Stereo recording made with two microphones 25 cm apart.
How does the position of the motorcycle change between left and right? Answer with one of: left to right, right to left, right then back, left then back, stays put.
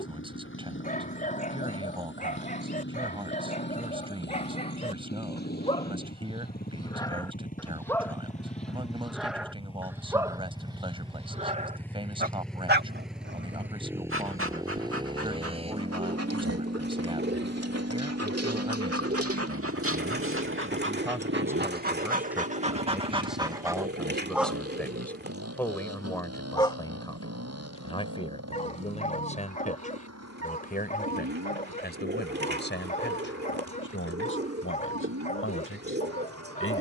left to right.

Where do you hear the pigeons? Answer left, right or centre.
right.